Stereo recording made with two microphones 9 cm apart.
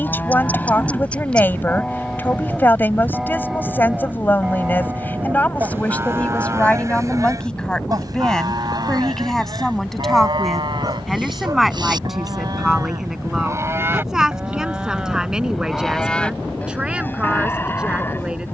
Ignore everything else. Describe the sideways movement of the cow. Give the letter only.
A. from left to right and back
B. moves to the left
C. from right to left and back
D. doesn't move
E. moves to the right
A.